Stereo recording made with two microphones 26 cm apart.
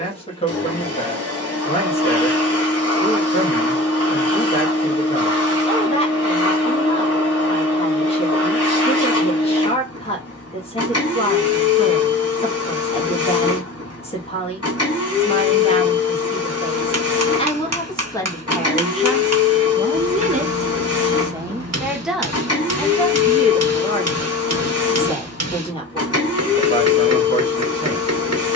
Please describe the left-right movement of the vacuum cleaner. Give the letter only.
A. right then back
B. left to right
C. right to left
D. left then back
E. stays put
E.